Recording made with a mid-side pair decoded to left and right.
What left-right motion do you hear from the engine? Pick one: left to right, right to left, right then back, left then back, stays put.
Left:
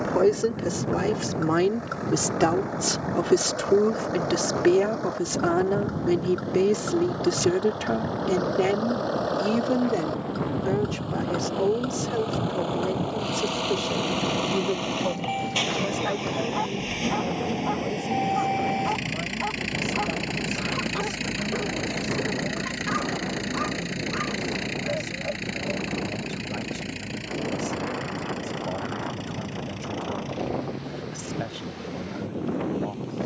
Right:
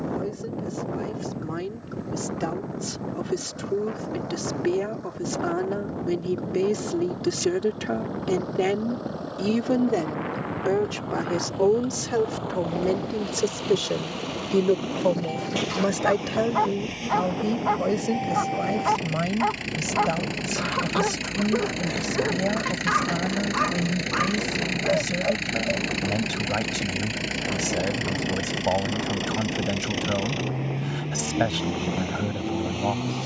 left to right.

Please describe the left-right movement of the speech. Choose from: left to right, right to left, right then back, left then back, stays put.
left to right.